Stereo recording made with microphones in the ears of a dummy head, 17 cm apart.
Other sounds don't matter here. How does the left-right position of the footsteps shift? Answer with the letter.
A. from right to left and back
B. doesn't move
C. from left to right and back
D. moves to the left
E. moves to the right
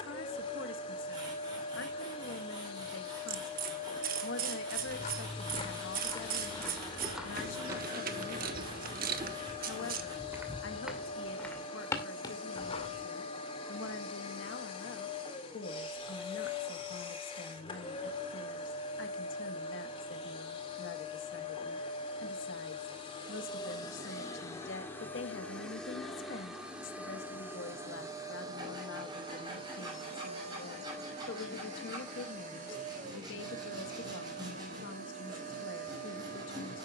C.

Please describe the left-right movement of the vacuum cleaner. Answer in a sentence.
In this clip you hear the vacuum cleaner move from left to right.